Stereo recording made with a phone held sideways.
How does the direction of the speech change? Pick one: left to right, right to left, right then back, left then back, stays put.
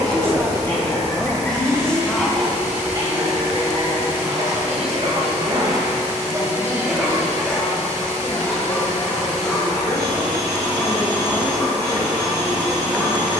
left then back.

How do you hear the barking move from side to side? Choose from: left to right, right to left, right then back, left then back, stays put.
right then back.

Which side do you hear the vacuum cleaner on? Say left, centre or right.
right.